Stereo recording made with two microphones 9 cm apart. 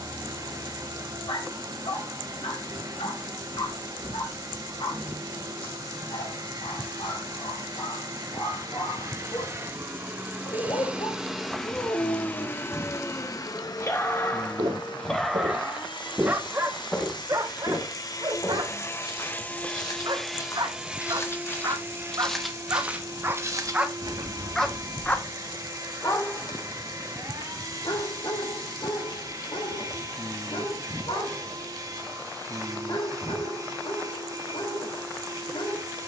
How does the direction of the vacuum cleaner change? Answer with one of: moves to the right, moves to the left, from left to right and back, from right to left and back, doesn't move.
from right to left and back.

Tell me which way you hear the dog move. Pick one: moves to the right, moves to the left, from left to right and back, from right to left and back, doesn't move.
from left to right and back.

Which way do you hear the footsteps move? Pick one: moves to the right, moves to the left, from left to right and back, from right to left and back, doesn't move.
from right to left and back.